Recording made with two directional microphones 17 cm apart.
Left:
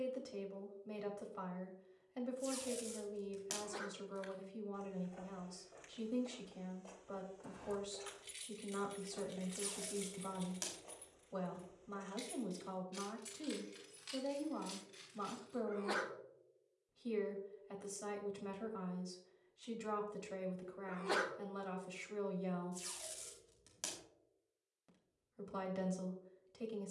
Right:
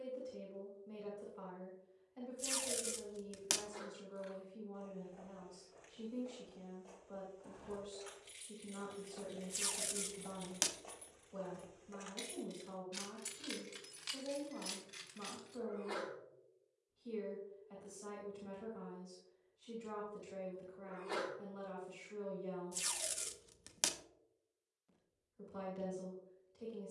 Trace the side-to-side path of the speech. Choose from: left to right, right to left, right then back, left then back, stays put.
stays put.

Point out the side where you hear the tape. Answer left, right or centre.
right.